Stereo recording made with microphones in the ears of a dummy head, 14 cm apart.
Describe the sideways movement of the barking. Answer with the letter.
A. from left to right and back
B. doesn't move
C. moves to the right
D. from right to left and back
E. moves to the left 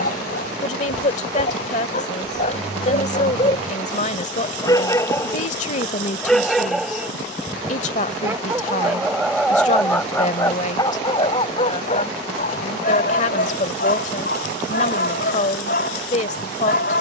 A.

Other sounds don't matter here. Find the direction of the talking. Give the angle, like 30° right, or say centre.
50° left.